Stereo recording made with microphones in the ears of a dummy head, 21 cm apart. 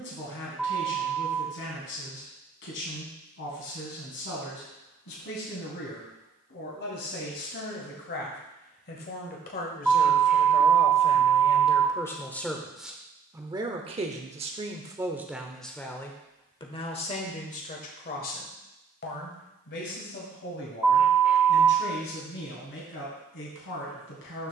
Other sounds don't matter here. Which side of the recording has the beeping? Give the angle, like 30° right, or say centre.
centre.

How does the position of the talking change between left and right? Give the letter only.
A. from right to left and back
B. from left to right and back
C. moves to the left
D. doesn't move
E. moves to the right
B.